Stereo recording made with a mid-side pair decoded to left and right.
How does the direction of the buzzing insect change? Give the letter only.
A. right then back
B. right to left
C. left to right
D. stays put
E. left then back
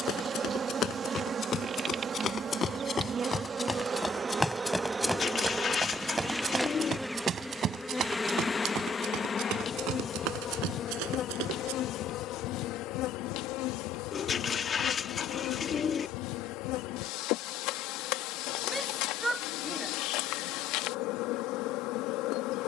B.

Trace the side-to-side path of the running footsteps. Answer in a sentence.
In this clip you hear the running footsteps go from the left side to the right.